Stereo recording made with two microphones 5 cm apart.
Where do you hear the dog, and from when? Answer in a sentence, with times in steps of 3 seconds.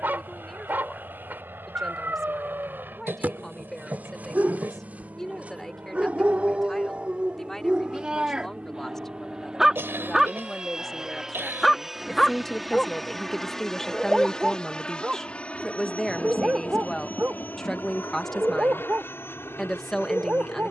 In this clip you hear the dog on the right from 0 s, in the centre from 9 s and on the right from 15 s.